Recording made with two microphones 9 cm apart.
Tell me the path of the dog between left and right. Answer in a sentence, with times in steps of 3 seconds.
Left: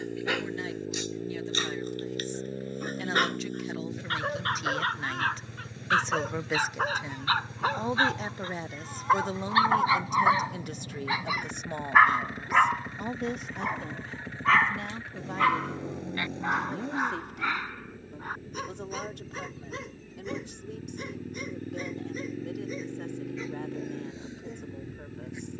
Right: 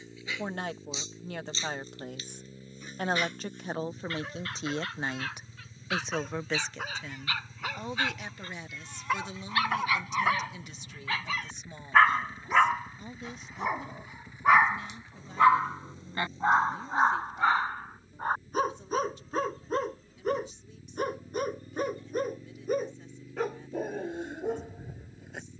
In this clip you hear the dog on the left from 0 s, in the centre from 12 s and on the right from 15 s.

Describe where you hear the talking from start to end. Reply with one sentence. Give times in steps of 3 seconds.
You can hear the talking on the right from 0 s and on the left from 6 s.